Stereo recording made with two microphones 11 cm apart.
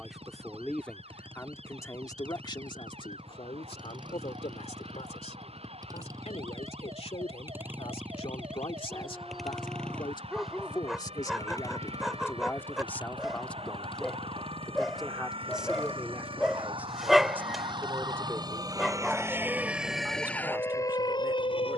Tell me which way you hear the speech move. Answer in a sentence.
You can hear the speech move from right to left and back again.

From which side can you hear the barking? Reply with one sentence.
In this clip you hear the barking in the centre.